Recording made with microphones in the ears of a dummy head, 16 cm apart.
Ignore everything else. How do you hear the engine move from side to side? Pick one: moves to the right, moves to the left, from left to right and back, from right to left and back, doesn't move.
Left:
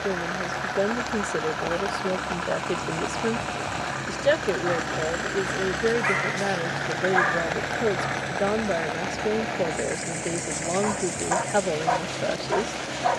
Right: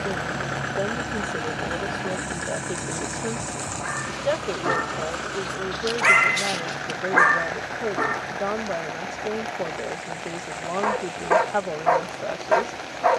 moves to the left.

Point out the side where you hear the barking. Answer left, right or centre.
right.